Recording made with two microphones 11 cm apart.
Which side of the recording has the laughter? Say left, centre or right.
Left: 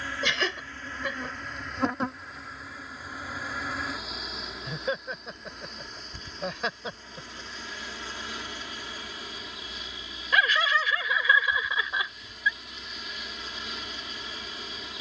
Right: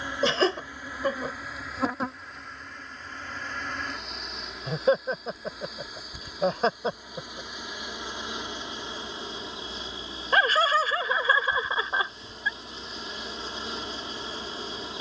right.